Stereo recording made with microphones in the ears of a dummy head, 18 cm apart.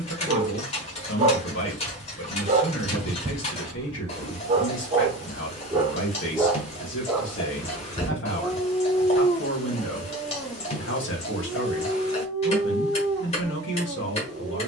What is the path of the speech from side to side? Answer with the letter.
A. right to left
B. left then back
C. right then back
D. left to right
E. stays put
E.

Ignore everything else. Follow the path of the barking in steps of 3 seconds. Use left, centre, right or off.
right, right, centre, centre, right.